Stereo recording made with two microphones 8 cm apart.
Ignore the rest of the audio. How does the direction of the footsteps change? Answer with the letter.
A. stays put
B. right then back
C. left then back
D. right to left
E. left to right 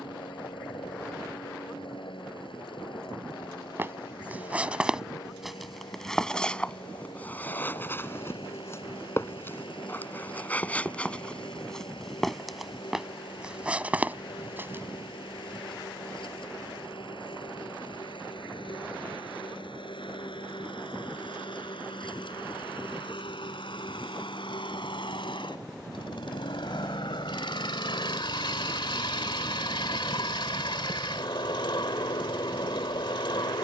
C.